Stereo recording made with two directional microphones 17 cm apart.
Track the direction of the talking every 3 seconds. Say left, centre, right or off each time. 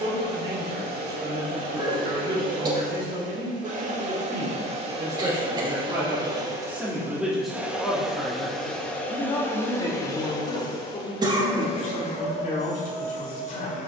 right, right, centre, left, left.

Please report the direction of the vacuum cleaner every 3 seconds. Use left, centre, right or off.
right, right, centre, left, left.